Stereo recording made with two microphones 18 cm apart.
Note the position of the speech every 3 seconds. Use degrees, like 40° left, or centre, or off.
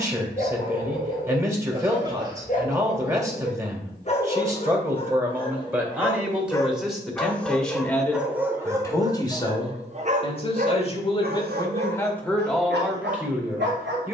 20° right, 10° right, centre, 30° left, centre.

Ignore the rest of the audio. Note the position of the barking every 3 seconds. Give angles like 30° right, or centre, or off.
50° left, 30° left, centre, 50° right, 80° right.